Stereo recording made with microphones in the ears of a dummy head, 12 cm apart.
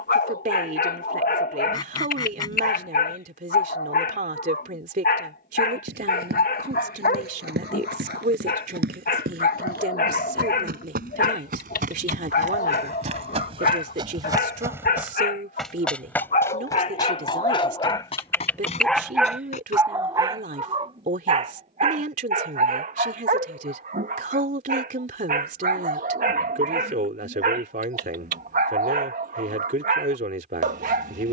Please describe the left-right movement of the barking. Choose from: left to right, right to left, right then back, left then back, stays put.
left to right.